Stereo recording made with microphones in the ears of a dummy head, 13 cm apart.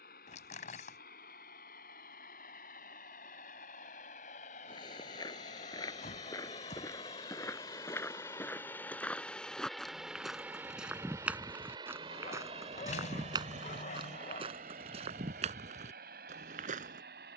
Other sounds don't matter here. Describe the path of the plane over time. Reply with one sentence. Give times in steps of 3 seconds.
In this clip you hear the plane on the left from 0 s, in the centre from 9 s and on the right from 12 s.